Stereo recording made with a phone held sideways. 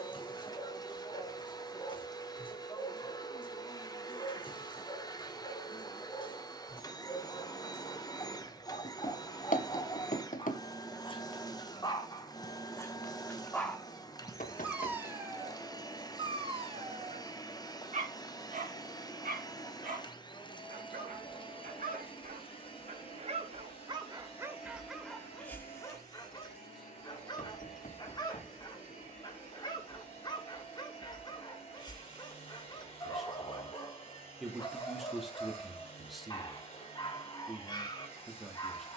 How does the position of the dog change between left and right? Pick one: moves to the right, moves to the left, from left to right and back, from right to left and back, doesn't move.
from left to right and back.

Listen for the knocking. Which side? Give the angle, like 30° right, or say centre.
60° left.